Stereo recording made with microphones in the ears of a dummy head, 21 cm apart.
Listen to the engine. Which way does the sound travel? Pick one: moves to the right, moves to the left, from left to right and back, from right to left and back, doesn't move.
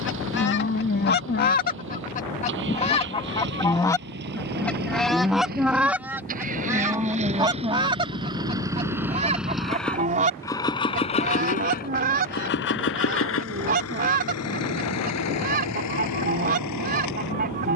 moves to the left.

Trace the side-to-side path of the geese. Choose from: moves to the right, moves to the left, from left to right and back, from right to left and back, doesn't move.
moves to the right.